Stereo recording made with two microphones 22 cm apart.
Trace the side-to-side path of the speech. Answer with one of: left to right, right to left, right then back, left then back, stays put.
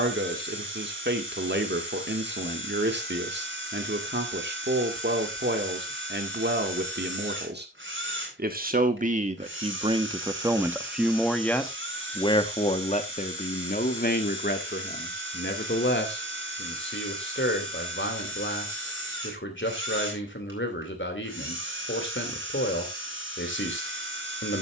right to left.